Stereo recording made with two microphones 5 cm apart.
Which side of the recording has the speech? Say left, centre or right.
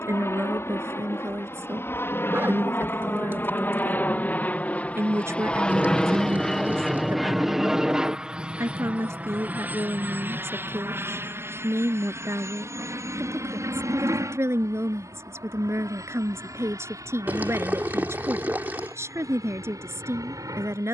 right.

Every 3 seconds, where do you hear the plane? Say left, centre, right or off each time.
left, left, centre, right, right, right, right.